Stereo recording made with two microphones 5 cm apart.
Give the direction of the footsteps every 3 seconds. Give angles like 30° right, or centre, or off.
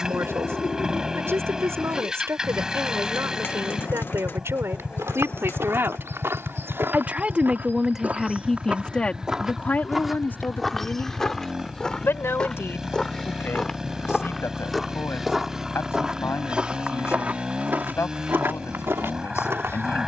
off, 70° right, 50° right, centre, 10° left, 20° right, 60° right.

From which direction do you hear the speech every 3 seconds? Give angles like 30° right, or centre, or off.
70° right, 70° right, 10° right, 40° left, 70° left, 70° left, 70° left.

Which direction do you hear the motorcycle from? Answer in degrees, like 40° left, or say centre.
10° right.